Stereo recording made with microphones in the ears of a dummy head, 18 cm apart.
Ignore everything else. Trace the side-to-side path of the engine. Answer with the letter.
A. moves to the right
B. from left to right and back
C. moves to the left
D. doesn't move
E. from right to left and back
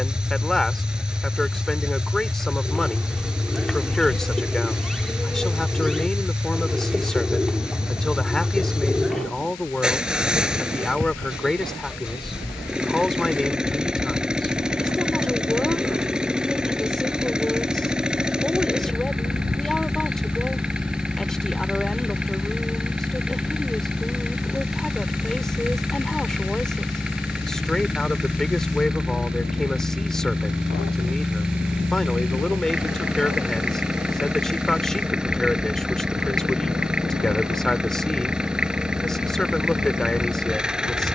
D.